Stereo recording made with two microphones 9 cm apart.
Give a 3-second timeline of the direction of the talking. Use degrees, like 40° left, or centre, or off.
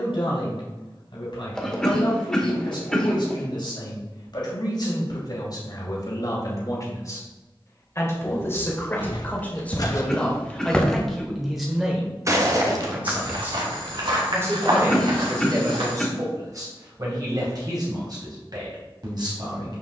60° left, 50° left, 40° left, 10° left, 20° right, 40° right, 50° right.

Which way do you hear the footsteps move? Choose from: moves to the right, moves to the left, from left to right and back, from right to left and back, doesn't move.
moves to the right.